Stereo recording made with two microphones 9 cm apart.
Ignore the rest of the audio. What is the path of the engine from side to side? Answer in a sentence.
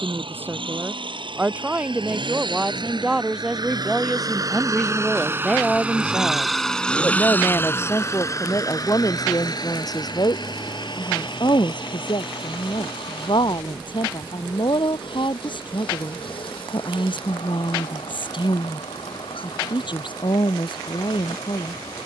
In this clip you hear the engine travel towards the left.